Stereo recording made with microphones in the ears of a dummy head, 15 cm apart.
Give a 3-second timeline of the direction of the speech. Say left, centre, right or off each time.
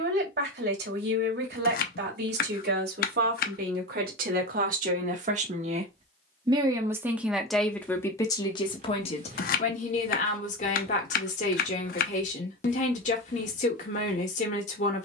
right, right, centre, left, left.